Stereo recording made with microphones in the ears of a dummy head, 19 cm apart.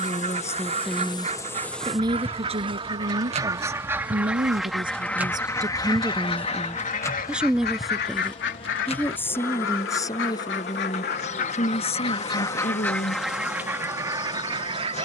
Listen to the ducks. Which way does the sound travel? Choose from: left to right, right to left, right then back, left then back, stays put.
left then back.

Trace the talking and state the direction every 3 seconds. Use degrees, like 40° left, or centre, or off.
10° right, 20° right, centre, 20° left, 30° left.